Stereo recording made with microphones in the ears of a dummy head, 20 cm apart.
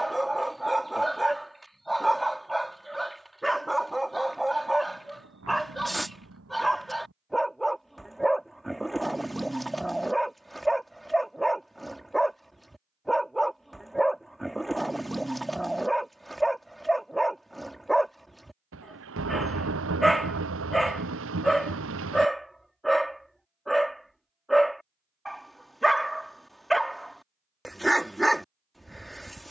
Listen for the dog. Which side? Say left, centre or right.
centre.